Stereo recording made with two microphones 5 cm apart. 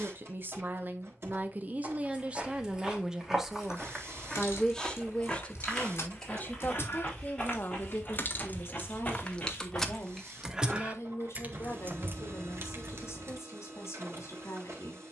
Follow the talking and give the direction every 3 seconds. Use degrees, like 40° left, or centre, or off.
40° right, 10° left, 40° left, 60° left, 70° left.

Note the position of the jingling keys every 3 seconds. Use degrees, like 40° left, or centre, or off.
off, 60° left, 50° left, 10° right, 60° right.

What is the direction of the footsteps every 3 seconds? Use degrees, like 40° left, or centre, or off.
20° right, centre, 20° left, 30° left, off.